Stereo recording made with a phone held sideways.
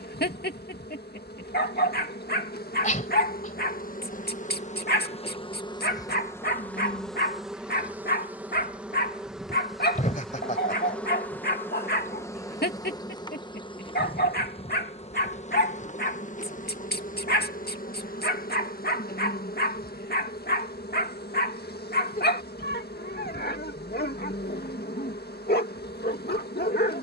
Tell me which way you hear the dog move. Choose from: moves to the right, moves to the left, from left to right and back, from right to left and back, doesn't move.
doesn't move.